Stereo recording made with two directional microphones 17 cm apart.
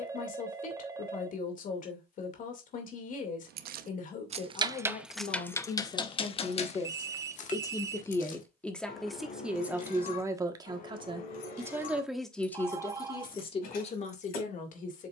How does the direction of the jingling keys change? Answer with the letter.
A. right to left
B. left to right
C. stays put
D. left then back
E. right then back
A.